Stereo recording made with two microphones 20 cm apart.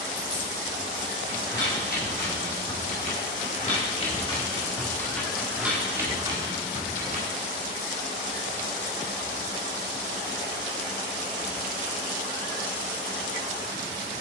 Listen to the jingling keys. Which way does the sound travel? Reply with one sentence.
You can hear the jingling keys move to the right.